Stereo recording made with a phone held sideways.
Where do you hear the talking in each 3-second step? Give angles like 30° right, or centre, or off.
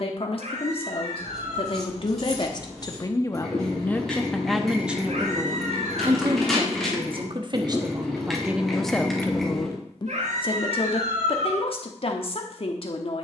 50° left, centre, 30° right, 40° left, 50° left.